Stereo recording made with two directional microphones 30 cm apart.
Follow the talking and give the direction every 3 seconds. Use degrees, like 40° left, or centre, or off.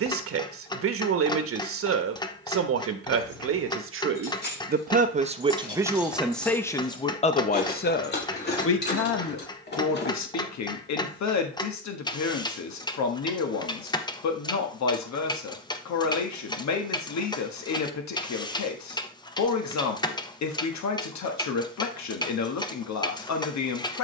40° right, 30° right, 20° left, 60° left, 60° left, 60° left, 60° left, 60° left.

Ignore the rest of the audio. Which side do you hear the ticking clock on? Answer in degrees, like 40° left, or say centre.
10° left.